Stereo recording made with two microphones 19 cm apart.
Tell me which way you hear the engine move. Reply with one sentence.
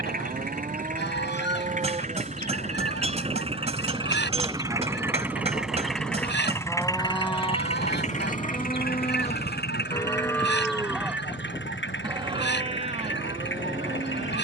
You can hear the engine move to the left.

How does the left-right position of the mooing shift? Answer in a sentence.
You can hear the mooing go left and come back.